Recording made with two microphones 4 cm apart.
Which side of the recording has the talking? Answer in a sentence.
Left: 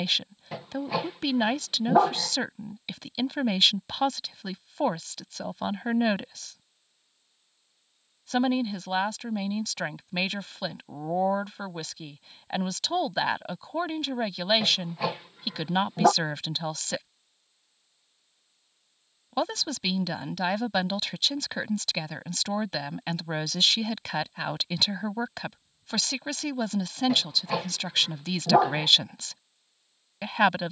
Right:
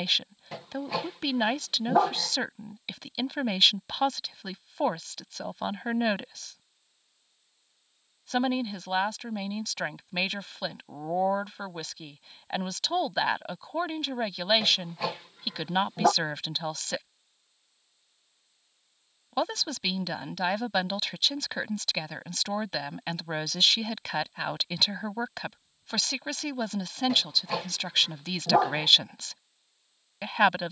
You can hear the talking in the centre.